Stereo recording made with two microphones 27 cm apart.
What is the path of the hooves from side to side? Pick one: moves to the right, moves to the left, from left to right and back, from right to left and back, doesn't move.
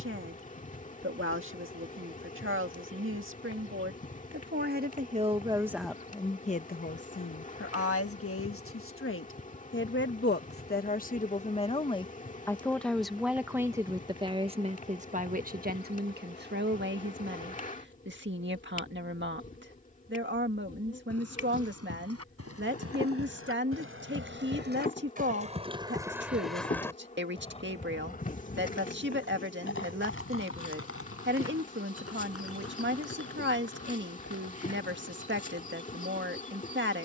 moves to the left.